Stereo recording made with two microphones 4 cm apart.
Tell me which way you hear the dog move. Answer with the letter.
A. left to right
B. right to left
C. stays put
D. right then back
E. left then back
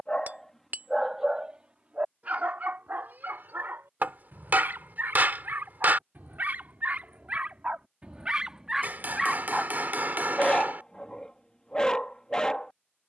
D.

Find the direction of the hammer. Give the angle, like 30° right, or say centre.
50° right.